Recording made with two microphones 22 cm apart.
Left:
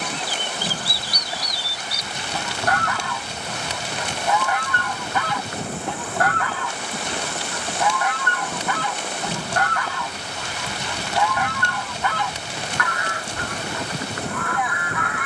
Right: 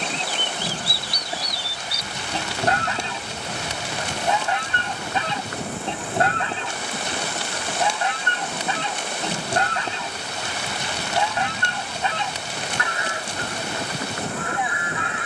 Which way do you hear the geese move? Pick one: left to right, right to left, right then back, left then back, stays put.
stays put.